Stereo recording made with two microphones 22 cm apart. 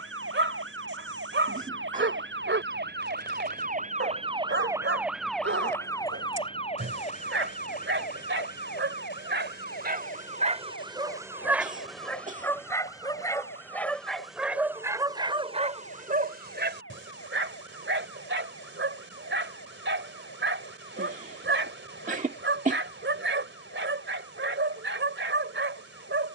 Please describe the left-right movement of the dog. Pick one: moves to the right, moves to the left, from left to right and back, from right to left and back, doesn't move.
from right to left and back.